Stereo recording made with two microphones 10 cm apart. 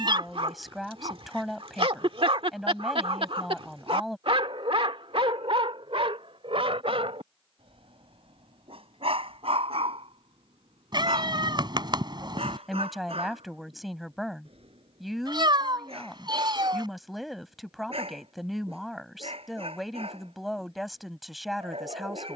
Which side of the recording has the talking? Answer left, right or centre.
centre.